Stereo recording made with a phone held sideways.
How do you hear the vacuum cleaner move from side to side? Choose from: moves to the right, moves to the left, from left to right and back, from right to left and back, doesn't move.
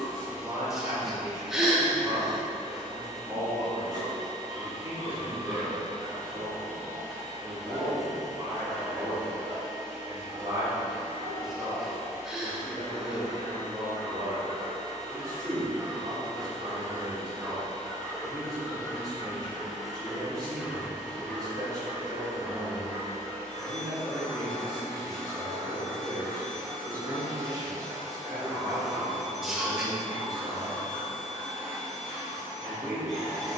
doesn't move.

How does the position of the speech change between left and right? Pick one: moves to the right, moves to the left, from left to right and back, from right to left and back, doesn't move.
doesn't move.